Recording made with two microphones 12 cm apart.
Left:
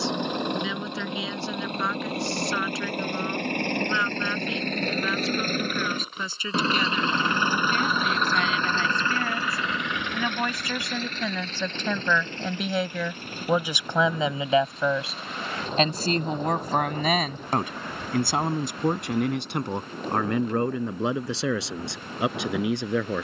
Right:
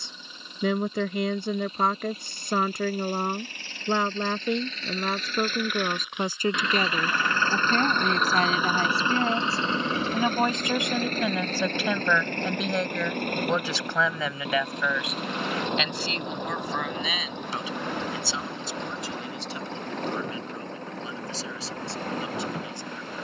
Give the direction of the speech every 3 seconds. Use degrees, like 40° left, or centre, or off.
50° right, 50° right, 40° right, 20° right, 10° left, 50° left, 60° left, 70° left.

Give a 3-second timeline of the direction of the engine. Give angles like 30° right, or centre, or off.
70° left, 60° left, 10° left, 40° right, 60° right, 70° right, 80° right, 80° right.